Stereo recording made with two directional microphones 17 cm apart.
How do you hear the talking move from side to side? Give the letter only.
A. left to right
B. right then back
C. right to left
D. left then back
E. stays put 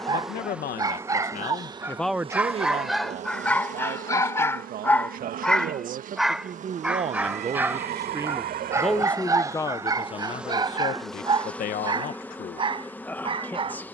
B.